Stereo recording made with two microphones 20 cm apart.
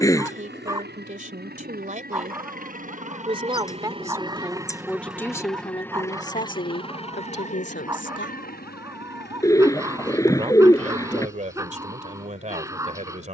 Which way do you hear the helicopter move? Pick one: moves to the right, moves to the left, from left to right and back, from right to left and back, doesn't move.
moves to the left.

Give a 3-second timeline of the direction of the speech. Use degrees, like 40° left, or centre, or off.
40° right, centre, 50° left, 30° right, 40° right.